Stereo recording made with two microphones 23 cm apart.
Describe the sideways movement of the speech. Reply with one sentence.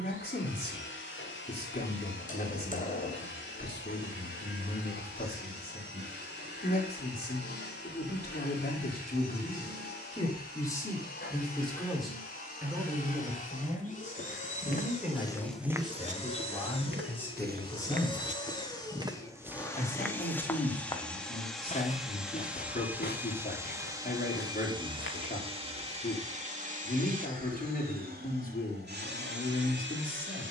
In this clip you hear the speech go right and come back.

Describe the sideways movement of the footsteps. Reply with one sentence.
You can hear the footsteps go right and come back.